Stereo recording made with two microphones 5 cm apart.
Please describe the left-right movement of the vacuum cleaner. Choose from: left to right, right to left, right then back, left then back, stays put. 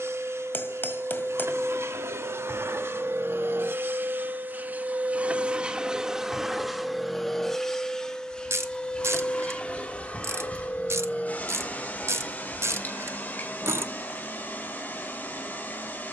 right to left.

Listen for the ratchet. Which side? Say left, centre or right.
right.